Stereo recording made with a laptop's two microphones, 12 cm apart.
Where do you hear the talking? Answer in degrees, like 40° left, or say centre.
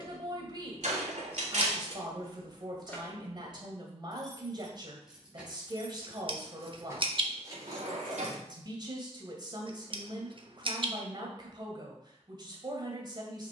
40° right.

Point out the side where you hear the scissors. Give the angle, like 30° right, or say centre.
50° right.